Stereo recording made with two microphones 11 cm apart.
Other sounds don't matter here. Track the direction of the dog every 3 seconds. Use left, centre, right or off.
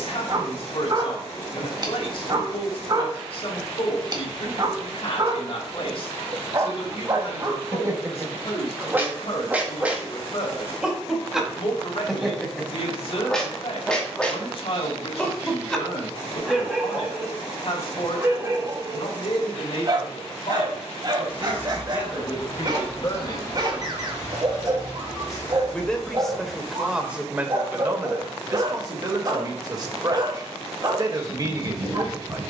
right, right, right, centre, centre, centre, right, right, right, right, right.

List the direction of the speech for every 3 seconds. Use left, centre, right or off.
left, left, left, left, left, left, left, left, centre, right, right.